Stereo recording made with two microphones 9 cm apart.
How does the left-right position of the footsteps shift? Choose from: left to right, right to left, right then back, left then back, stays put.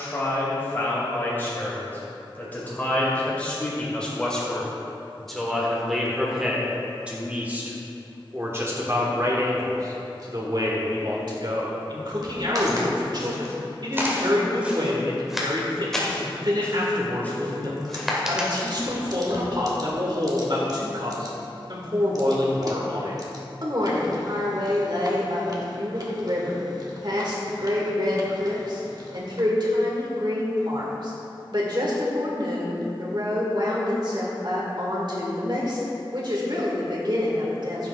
left then back.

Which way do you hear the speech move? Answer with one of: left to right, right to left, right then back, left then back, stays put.
left to right.